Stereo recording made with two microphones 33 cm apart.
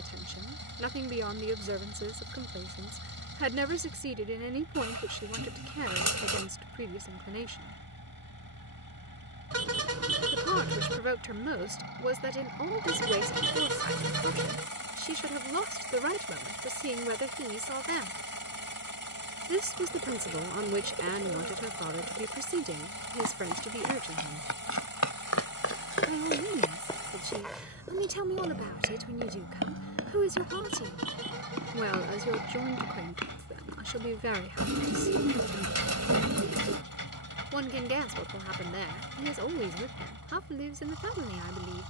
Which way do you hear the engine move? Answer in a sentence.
You can hear the engine stay put.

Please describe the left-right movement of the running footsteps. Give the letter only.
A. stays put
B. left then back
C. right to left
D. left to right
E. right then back
D.